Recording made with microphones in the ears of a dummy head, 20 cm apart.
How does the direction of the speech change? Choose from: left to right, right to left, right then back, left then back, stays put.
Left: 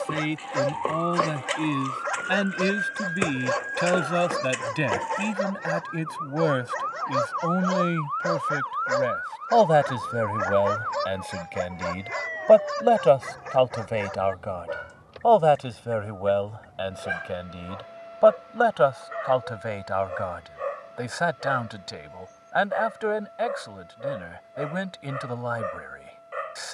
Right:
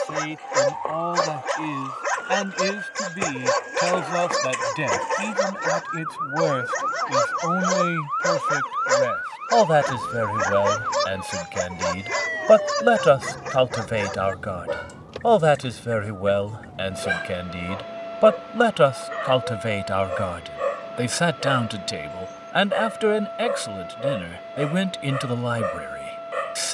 left to right.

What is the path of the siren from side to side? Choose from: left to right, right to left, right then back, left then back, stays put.
left to right.